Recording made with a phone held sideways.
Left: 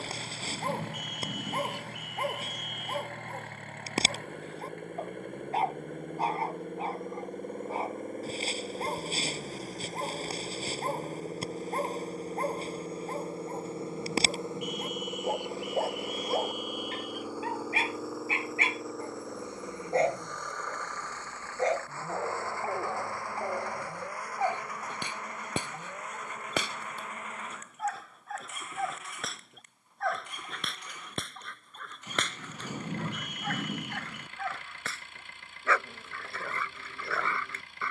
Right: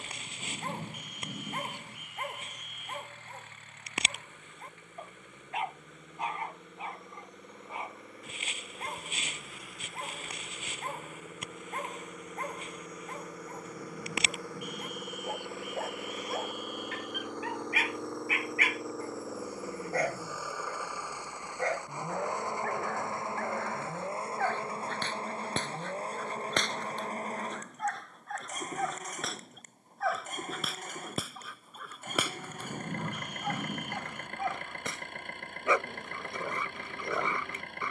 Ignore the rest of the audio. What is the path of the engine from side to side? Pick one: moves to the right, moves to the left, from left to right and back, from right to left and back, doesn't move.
moves to the right.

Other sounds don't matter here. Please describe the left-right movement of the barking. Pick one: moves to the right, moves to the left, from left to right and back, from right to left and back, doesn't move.
moves to the right.